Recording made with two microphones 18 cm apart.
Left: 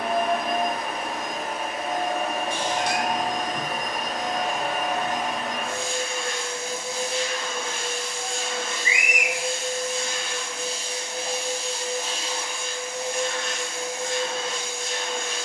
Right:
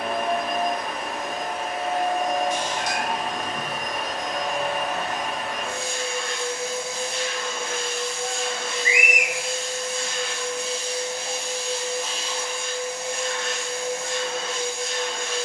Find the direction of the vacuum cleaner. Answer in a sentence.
You can hear the vacuum cleaner on the left.